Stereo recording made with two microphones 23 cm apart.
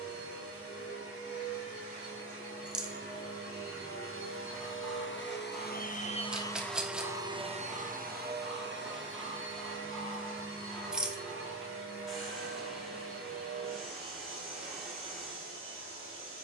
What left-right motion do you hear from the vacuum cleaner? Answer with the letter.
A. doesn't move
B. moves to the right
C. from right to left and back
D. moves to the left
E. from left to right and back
B.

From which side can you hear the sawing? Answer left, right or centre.
centre.